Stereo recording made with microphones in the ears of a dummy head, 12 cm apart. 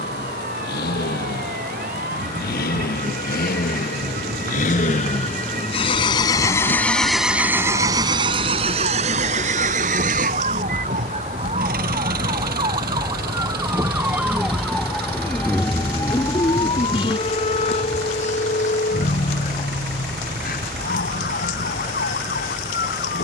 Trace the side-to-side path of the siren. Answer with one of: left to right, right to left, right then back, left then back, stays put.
right to left.